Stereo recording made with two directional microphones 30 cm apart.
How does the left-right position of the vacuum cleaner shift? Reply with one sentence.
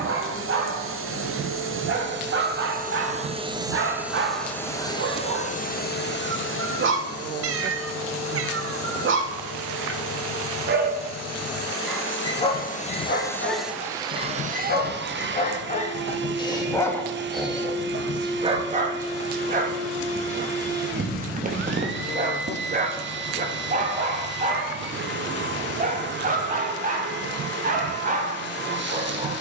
You can hear the vacuum cleaner move from right to left and back again.